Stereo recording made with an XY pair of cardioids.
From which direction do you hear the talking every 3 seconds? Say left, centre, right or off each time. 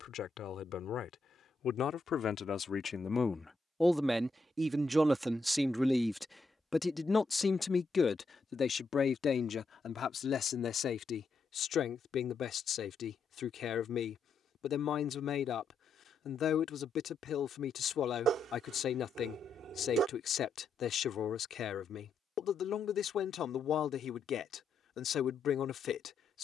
left, centre, left, left, left, left, left, left, left.